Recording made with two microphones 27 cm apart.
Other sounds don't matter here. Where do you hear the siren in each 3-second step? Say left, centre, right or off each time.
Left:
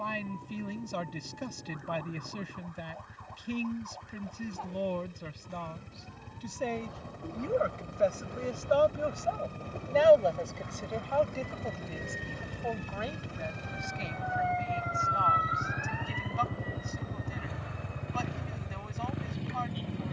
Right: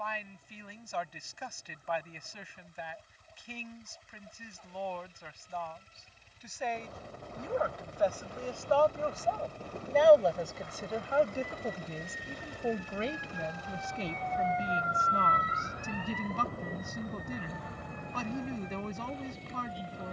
left, left, left, left, left, right, right.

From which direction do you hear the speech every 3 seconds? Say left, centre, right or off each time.
left, left, left, centre, right, right, right.